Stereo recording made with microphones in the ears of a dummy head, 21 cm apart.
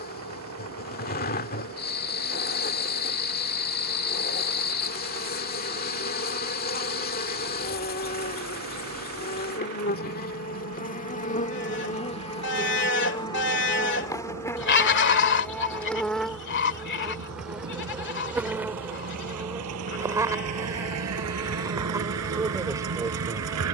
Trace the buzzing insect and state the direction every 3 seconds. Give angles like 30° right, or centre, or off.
40° left, 40° left, 40° left, 40° left, 20° left, centre, 10° right, 20° right.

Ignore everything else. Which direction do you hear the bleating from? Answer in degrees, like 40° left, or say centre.
50° left.